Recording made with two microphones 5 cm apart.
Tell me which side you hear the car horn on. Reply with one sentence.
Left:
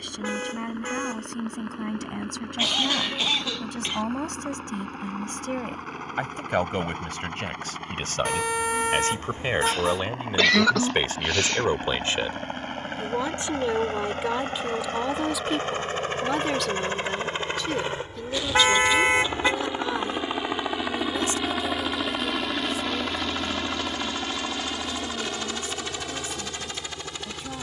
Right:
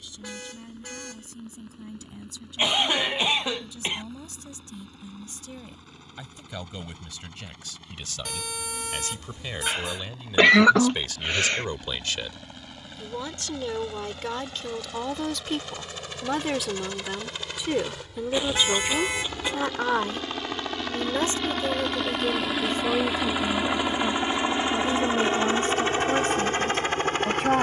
In this clip you hear the car horn on the left.